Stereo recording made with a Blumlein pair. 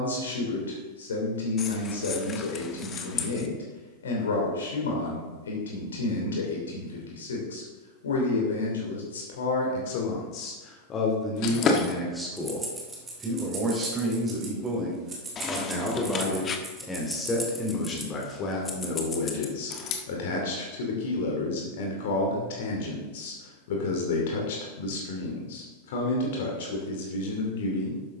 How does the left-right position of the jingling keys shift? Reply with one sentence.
In this clip you hear the jingling keys go right and come back.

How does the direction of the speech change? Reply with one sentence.
In this clip you hear the speech go right and come back.